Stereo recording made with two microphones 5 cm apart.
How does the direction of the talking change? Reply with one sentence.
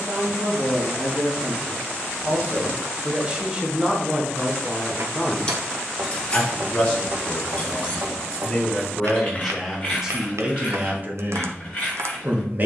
In this clip you hear the talking move from right to left and back again.